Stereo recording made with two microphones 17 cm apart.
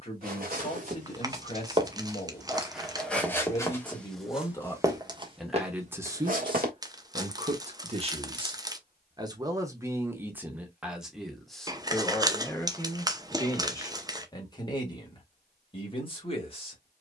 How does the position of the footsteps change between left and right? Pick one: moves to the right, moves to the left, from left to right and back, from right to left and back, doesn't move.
from right to left and back.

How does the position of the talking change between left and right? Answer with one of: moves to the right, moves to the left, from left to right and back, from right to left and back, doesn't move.
from left to right and back.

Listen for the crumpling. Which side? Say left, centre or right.
right.